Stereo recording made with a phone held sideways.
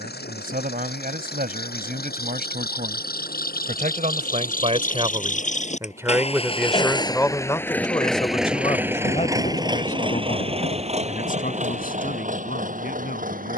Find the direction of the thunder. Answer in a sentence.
You can hear the thunder on the left.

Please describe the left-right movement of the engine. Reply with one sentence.
In this clip you hear the engine go from the left side to the right.